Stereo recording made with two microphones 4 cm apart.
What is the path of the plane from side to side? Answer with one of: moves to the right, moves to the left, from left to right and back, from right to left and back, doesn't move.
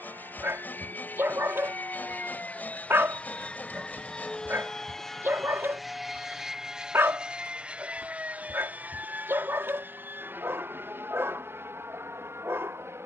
moves to the right.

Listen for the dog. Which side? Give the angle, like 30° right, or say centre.
60° right.